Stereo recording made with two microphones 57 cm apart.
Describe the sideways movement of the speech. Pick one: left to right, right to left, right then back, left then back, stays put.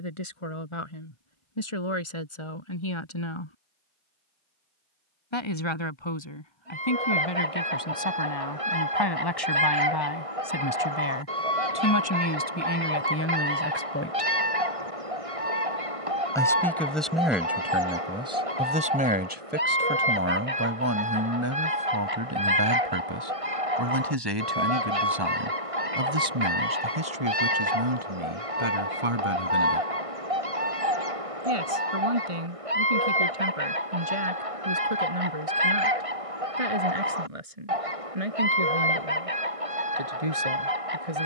left to right.